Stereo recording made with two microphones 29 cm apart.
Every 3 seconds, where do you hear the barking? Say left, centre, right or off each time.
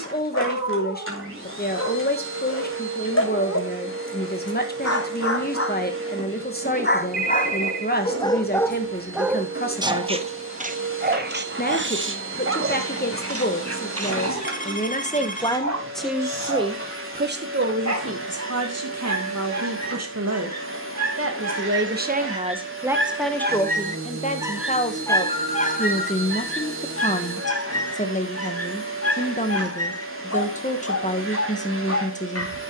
left, left, left, right, right, right, right, right, left, left, left.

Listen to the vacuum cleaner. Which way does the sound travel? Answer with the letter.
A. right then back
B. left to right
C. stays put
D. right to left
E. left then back
C.